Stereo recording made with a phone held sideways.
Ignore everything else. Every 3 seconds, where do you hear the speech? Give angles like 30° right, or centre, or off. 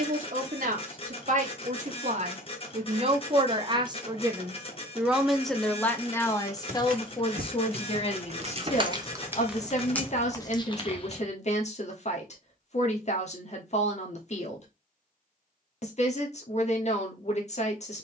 60° right, 20° right, 40° left, 50° left, 50° left, 50° left.